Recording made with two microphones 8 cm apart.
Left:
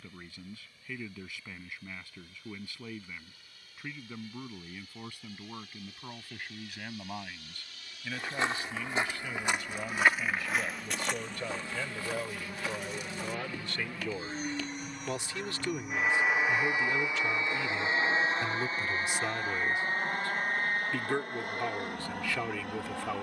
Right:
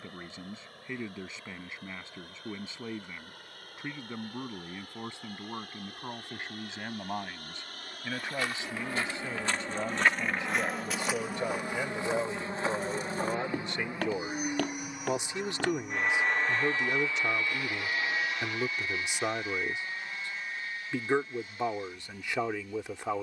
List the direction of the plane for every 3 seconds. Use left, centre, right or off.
right, right, right, right, right, centre, left, left.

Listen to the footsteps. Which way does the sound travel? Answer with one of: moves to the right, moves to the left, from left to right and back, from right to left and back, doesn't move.
moves to the right.